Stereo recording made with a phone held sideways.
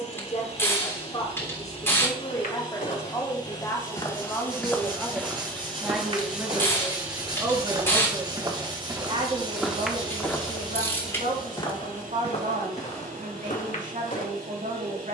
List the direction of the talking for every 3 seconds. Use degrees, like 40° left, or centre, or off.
20° left, 10° left, 20° right, 50° right, 50° right.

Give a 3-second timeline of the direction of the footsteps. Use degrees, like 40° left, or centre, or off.
50° left, 10° left, 30° right, 10° left, 50° left.